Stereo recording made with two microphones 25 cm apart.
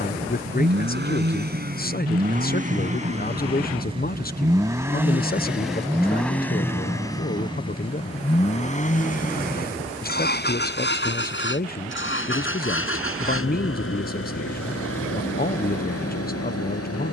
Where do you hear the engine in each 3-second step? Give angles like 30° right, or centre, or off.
40° right, 10° right, 20° left, 40° left, 50° left, 60° left.